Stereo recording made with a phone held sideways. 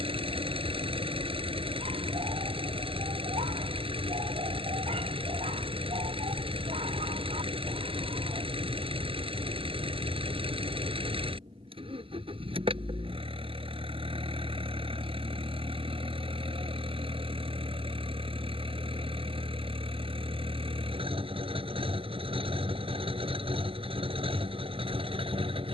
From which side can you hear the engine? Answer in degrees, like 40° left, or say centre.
40° right.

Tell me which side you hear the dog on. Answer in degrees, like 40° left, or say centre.
50° right.